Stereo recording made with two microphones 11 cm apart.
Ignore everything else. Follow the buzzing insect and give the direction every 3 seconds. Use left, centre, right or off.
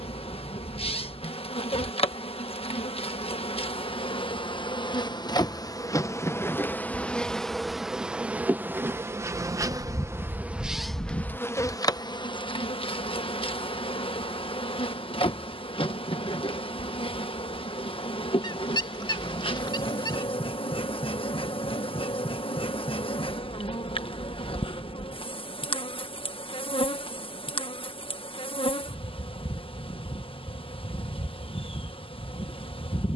left, left, centre, centre, left, left, left, left, left, left, left.